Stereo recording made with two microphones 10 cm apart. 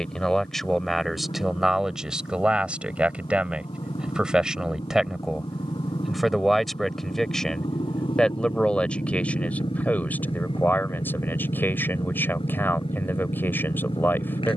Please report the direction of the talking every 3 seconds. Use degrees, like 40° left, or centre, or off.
centre, 10° right, 10° left, 20° left, 20° left.